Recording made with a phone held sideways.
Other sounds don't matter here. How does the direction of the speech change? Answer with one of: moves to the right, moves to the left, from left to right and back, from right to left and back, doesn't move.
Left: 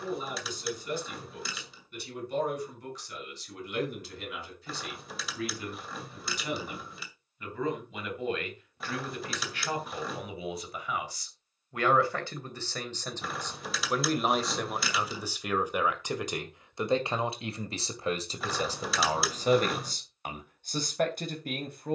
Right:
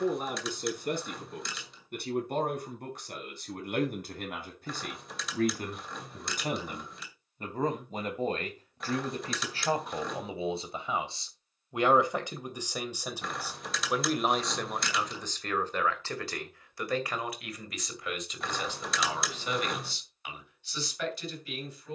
moves to the left.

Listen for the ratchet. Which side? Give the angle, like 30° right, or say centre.
centre.